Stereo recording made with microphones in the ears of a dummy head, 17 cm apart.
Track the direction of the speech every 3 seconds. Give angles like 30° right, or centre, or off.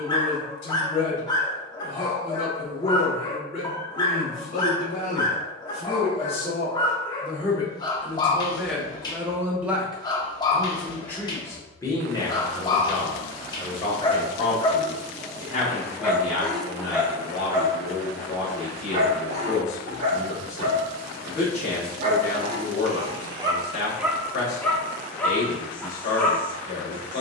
40° left, 40° left, 20° left, centre, 30° left, 40° left, 40° left, 40° left, 40° left.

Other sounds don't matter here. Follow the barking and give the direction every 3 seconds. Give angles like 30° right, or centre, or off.
20° left, 20° left, 20° left, 20° left, 20° left, centre, 40° right, 40° right, 10° left.